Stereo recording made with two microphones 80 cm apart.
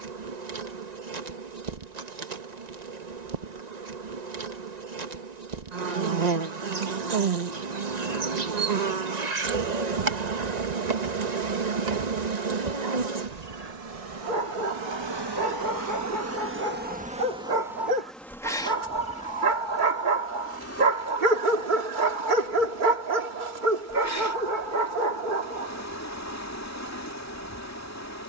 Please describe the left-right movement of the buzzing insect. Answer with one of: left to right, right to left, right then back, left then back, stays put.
right to left.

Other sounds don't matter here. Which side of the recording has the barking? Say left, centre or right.
right.